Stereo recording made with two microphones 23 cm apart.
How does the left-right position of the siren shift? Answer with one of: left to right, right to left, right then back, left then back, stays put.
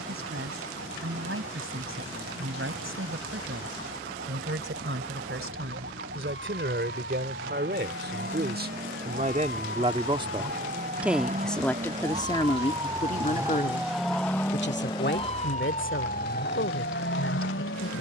right to left.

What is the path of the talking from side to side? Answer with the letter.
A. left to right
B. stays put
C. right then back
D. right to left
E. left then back
D.